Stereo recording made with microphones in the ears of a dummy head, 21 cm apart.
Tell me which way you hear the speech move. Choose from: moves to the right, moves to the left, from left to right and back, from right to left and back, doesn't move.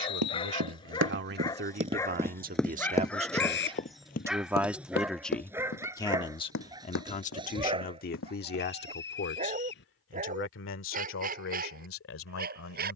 moves to the left.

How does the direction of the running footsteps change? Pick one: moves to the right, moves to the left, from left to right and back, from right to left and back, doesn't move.
moves to the left.